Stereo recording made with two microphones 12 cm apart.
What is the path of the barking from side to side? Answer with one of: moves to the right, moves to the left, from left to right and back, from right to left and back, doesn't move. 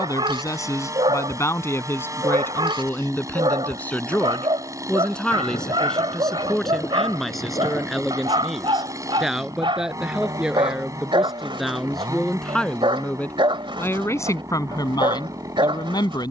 doesn't move.